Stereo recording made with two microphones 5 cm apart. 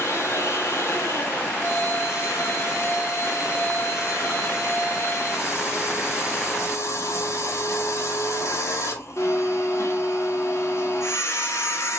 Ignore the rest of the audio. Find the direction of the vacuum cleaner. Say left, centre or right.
left.